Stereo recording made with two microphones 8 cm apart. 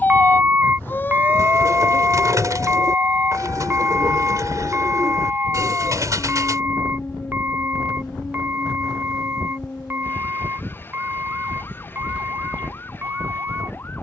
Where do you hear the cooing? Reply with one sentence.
You can hear the cooing on the right.